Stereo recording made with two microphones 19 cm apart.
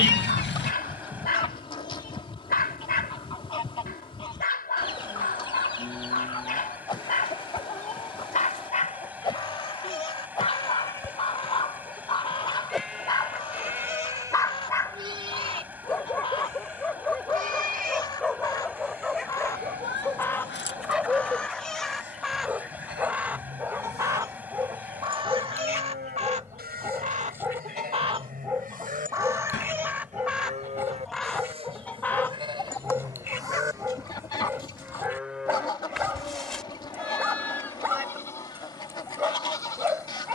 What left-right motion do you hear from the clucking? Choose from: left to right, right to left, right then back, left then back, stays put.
right then back.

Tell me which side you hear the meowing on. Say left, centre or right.
left.